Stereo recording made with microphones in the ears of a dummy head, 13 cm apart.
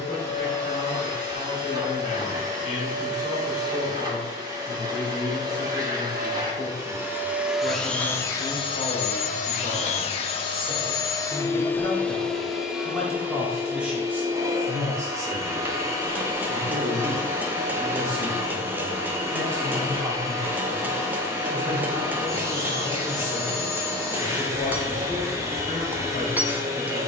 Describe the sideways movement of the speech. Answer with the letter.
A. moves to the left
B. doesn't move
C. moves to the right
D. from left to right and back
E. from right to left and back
D.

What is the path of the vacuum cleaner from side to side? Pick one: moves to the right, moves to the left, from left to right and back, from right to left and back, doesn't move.
from right to left and back.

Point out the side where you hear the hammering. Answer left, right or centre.
centre.